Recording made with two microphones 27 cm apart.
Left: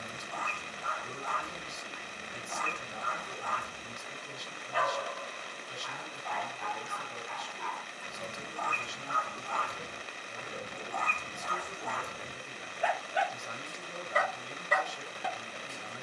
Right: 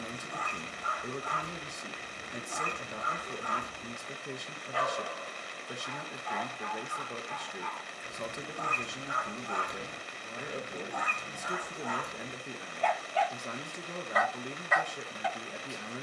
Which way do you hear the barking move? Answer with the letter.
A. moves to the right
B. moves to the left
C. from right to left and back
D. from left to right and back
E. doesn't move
B.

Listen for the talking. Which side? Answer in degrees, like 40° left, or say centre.
60° right.